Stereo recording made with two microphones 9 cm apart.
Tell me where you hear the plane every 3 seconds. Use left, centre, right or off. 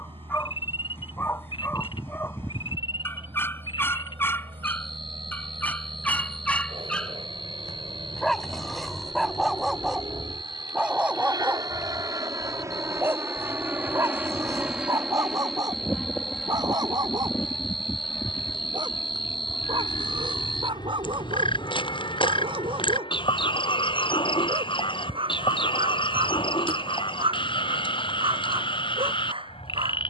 right, right, right, right, right, centre, left, left, left, left.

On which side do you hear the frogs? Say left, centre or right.
left.